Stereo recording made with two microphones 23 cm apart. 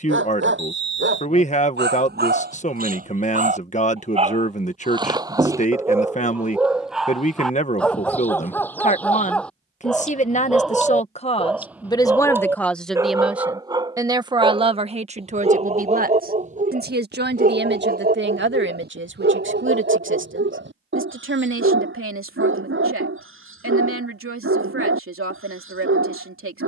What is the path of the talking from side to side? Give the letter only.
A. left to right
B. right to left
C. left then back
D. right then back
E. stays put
A.